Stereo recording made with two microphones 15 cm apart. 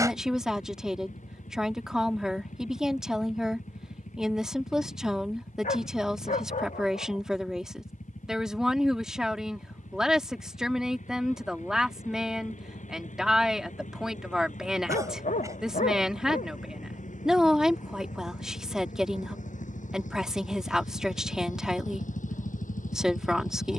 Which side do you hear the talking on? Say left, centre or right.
centre.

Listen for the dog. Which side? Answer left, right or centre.
left.